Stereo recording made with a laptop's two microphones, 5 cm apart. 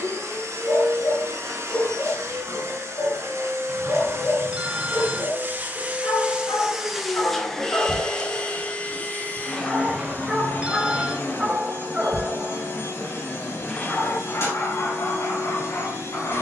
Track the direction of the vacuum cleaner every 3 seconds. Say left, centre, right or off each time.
right, right, centre, left, left, left.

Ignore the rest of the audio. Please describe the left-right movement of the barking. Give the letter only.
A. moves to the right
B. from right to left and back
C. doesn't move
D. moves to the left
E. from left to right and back
E.